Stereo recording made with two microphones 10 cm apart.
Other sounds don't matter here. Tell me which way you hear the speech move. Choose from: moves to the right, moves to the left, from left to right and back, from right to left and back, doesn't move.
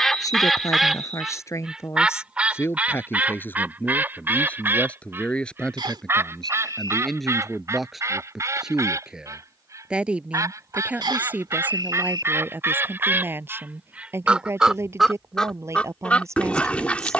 moves to the right.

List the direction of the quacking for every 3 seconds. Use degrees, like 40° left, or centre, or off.
10° right, 20° right, 30° right, 30° right, 20° right, 10° left.